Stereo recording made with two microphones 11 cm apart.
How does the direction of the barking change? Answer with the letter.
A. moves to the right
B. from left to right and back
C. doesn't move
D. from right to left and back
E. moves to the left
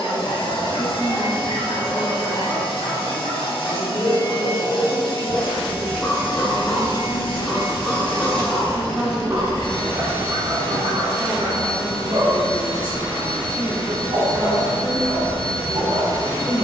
A.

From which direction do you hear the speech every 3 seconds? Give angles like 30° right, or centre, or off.
centre, 30° left, centre, 20° right, 30° right, 30° right.